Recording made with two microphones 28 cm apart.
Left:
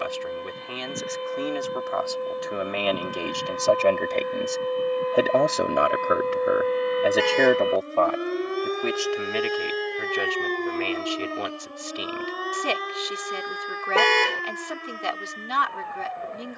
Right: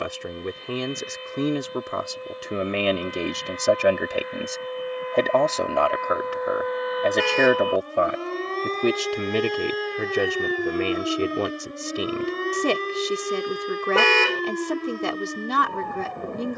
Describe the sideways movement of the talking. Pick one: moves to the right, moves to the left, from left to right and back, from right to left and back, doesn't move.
from right to left and back.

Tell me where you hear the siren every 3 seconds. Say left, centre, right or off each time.
left, left, left, centre, right, right.